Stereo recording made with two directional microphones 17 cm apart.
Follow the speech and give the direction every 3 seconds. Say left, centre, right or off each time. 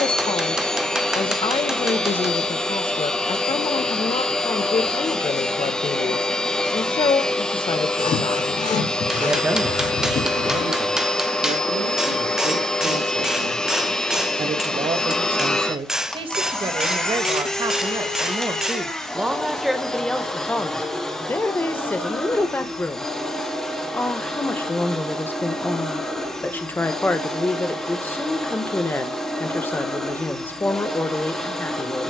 left, left, left, right, right, right, centre, centre, centre, centre, centre.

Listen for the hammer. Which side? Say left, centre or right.
centre.